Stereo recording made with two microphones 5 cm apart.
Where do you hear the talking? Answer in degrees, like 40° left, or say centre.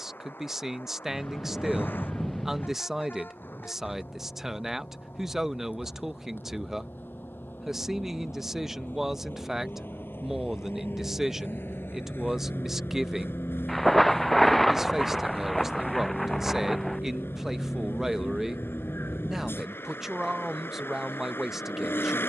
10° right.